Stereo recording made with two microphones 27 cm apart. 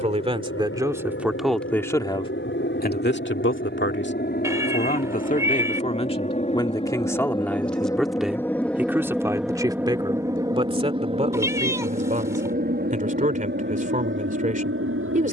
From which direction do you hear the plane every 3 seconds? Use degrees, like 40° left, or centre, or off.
50° left, 40° left, 20° left, 10° right, 40° right.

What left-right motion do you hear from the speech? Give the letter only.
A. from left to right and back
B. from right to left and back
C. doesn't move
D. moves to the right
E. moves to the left
B.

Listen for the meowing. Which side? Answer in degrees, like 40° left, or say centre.
10° right.